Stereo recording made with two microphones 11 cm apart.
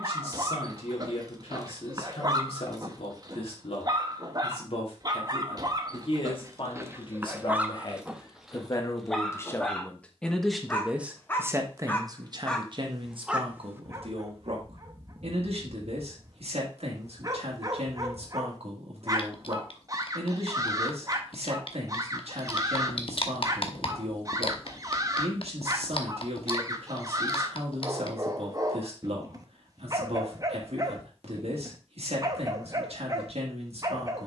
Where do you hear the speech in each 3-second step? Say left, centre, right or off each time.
left, left, left, centre, right, right, right, right, right, right, right, right.